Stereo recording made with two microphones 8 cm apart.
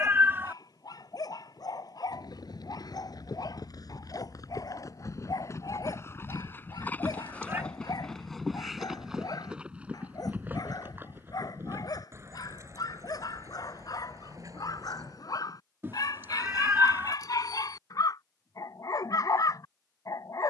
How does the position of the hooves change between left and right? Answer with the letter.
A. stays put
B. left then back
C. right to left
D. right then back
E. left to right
E.